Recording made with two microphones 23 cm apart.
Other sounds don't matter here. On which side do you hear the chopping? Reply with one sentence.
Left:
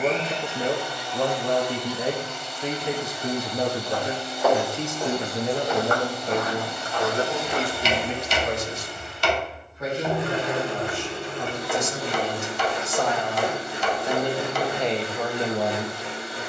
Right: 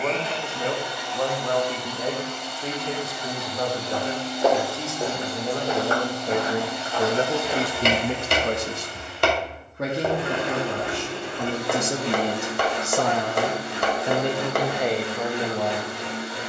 In this clip you hear the chopping on the right.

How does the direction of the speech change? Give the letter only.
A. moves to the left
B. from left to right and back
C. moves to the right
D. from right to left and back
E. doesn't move
B.